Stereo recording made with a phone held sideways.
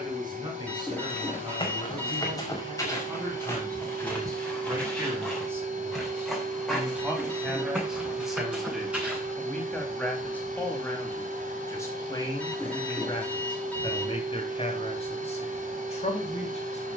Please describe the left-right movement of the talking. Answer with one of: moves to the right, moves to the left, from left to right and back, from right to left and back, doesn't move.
moves to the left.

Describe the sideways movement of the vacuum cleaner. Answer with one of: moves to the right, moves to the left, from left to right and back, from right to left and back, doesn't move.
doesn't move.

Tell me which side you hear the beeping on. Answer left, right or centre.
centre.